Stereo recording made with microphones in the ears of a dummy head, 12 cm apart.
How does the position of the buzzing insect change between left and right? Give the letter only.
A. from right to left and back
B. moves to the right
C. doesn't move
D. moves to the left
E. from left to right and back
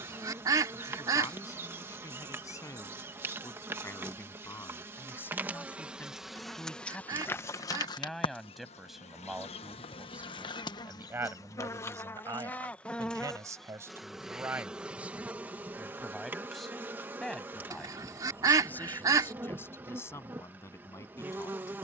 A.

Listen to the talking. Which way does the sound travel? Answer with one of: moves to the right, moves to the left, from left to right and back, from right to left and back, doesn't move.
from left to right and back.